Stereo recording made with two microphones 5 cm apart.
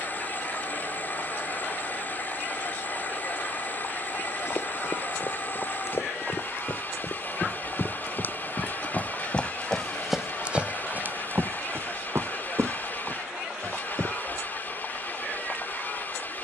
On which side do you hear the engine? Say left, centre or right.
left.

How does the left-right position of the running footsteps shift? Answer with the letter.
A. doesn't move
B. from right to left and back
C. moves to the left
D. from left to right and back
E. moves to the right
E.